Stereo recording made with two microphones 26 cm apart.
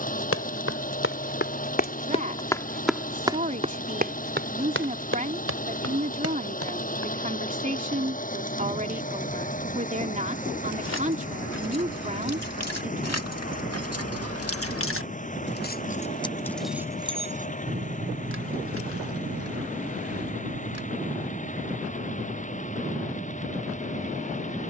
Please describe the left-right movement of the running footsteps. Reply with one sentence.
You can hear the running footsteps move from left to right.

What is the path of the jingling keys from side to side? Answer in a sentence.
You can hear the jingling keys travel towards the right.